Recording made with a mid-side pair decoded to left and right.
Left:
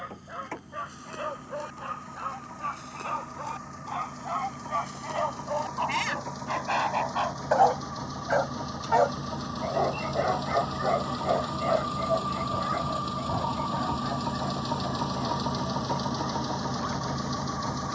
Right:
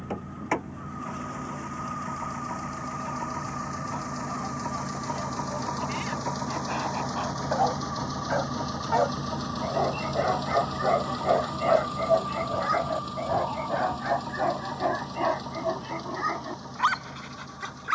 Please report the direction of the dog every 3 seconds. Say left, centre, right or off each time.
left, left, left, centre, right, right.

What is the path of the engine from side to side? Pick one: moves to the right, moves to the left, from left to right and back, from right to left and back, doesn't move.
moves to the left.